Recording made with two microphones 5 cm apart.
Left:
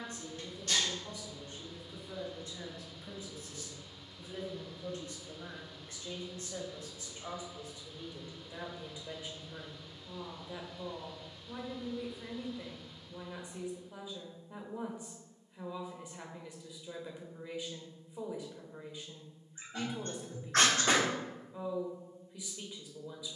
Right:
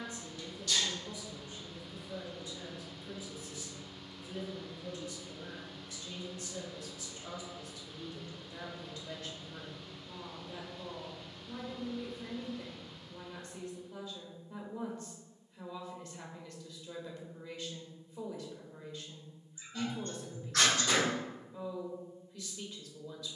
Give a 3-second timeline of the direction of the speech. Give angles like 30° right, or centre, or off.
50° left, 40° left, 30° left, 10° left, 10° left, 10° left, 10° left, 10° left.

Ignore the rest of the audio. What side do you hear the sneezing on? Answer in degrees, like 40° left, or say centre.
40° left.